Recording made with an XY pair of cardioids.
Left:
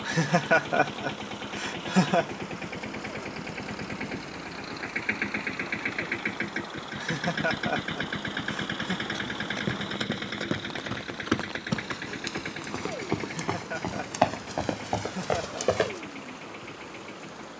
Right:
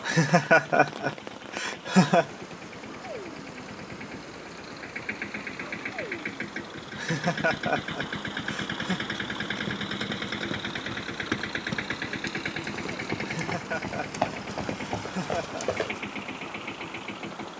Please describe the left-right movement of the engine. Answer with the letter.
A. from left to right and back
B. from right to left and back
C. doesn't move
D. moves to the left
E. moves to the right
E.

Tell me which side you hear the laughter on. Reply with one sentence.
In this clip you hear the laughter on the right.